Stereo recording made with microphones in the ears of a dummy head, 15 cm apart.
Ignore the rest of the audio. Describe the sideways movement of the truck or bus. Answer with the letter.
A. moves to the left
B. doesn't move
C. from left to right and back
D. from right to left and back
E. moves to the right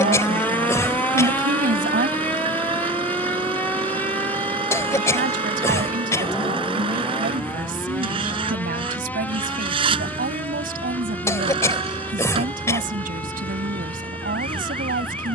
B.